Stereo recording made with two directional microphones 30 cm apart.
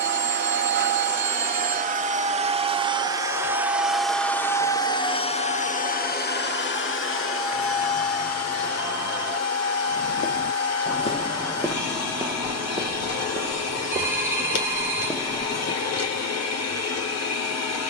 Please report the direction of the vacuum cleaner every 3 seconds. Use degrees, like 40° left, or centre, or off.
30° right, 10° left, 50° left, 60° left, 60° left, 60° left.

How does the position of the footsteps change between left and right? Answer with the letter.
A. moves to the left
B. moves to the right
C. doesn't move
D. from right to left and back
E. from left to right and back
E.